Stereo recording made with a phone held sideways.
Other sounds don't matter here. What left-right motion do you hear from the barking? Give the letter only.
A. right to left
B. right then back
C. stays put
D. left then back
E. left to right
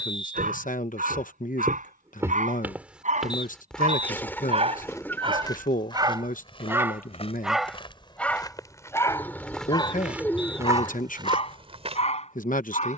A.